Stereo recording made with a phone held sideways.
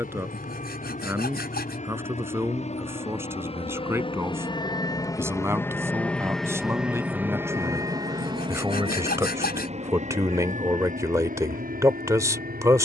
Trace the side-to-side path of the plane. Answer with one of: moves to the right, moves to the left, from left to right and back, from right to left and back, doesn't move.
moves to the right.